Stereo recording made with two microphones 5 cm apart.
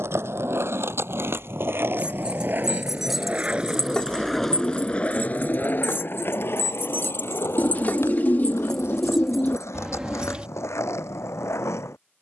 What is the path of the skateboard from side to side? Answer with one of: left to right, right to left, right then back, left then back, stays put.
right to left.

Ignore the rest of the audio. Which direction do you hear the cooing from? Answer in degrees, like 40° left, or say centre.
40° left.